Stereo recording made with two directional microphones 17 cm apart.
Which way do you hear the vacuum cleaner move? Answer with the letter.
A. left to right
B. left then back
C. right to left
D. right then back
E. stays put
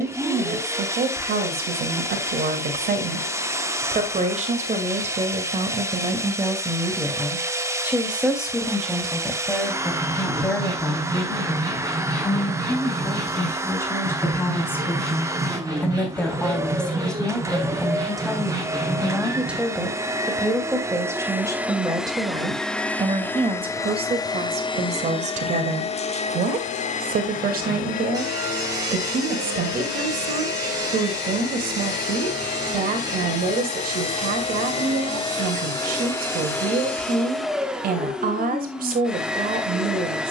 B.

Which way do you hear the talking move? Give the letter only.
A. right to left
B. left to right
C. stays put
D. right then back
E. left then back
E.